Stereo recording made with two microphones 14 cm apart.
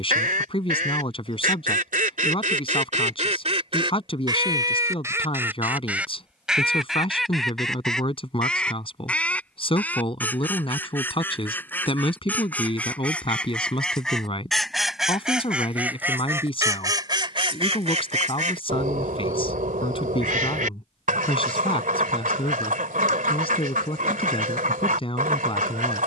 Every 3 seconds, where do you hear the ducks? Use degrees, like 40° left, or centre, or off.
80° right, 30° right, centre, 10° left, 10° left, 20° right, 70° right, 80° right, 80° right.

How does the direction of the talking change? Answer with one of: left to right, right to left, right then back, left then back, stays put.
stays put.